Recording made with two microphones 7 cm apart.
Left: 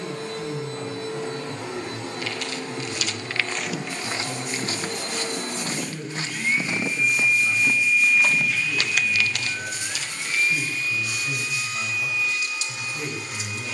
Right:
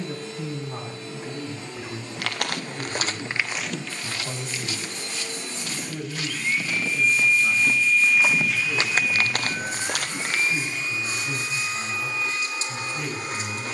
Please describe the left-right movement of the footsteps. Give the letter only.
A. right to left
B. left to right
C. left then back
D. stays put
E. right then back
C.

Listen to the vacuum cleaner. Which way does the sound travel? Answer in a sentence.
You can hear the vacuum cleaner go from the left side to the right.